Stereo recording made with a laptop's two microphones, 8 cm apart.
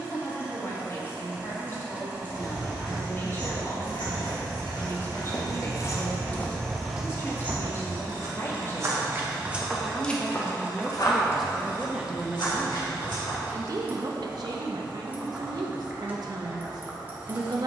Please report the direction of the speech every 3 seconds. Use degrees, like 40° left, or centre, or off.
40° left, 40° left, 30° left, 10° left, 40° right, 60° right.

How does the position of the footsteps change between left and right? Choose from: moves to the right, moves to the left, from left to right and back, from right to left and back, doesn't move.
from left to right and back.